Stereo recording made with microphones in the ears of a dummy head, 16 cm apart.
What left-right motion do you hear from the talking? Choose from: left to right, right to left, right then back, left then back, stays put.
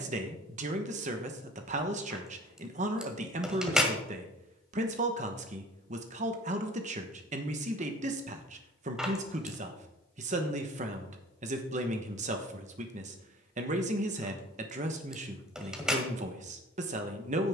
stays put.